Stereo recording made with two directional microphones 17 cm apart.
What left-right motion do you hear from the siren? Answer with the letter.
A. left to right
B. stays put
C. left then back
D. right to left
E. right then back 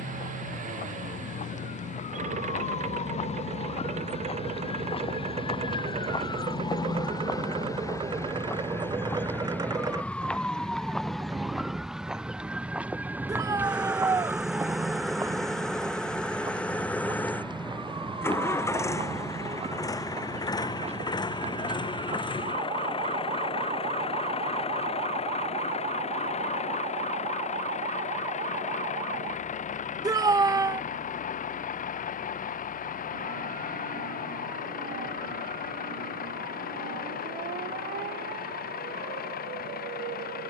A.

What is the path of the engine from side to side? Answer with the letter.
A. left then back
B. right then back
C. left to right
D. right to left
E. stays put
D.